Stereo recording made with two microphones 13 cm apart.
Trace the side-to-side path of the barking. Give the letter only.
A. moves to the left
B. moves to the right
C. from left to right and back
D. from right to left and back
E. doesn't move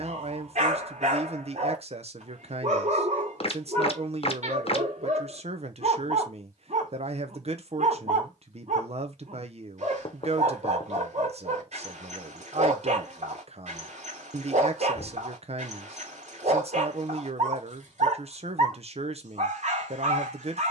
E.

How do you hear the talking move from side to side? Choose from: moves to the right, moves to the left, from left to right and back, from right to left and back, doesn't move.
doesn't move.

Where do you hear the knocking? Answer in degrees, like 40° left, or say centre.
50° left.